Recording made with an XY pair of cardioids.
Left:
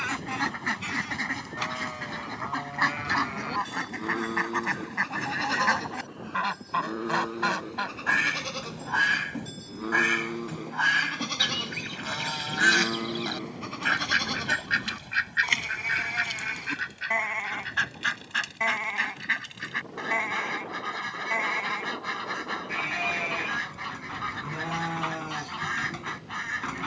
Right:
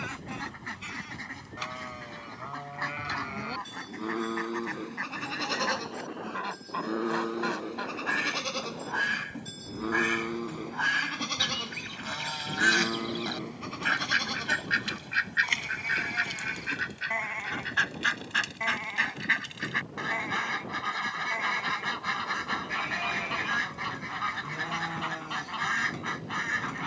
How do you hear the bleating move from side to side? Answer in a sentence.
You can hear the bleating move from left to right and back again.